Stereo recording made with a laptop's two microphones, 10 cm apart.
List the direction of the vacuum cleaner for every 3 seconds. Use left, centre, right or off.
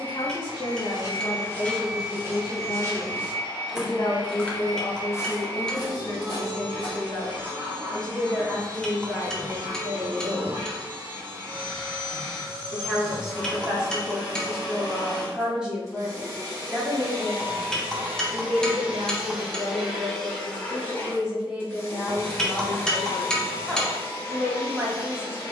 right, right, right, right, right, right, centre, left, left.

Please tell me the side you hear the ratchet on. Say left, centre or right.
centre.